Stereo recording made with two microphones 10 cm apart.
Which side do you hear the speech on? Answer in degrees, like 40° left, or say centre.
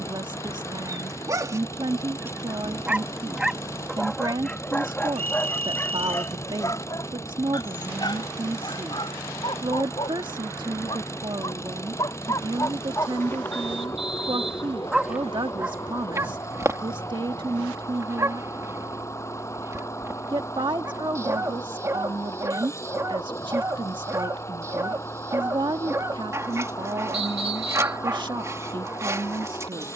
50° right.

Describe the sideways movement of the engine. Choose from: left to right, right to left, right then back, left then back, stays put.
stays put.